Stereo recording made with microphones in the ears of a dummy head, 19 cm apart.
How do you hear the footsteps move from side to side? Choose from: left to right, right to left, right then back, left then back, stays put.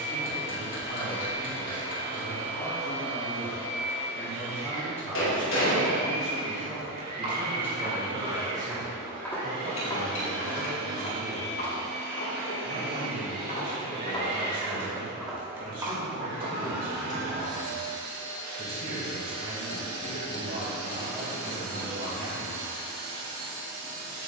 left then back.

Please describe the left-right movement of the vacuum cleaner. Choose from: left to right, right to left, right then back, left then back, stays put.
stays put.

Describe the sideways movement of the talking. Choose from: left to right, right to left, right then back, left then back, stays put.
left to right.